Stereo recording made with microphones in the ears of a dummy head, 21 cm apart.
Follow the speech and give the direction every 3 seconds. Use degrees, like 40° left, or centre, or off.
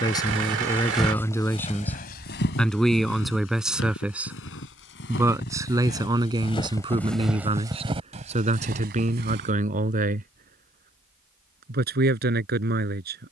10° left, 10° right, 20° right, 40° right, 40° right.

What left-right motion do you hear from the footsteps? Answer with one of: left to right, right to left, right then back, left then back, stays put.
left then back.